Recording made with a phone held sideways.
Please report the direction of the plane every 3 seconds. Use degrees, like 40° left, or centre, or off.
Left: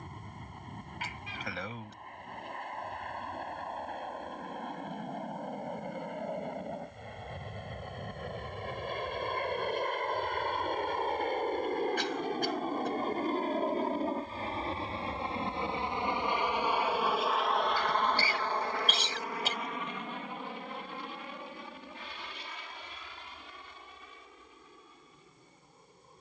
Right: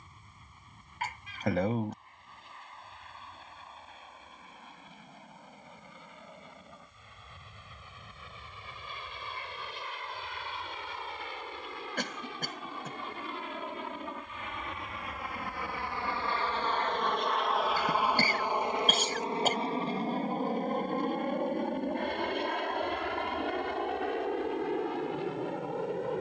70° left, 70° left, 60° left, 50° left, 40° left, 10° left, 30° right, 50° right, 70° right.